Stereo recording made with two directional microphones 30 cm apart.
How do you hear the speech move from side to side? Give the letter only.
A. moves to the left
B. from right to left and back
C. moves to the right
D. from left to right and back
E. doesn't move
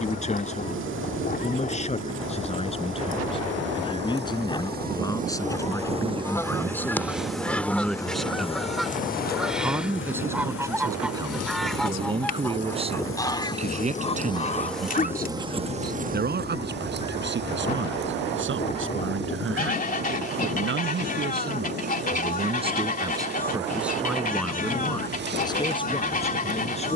D.